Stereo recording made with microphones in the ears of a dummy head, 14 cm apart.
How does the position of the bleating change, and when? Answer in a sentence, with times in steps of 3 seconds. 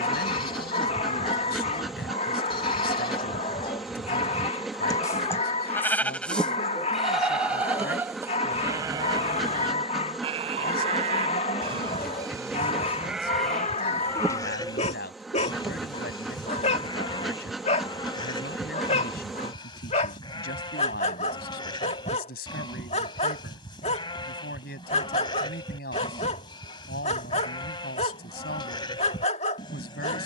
You can hear the bleating on the left from 0 s, in the centre from 6 s, on the right from 9 s, in the centre from 12 s and on the left from 15 s.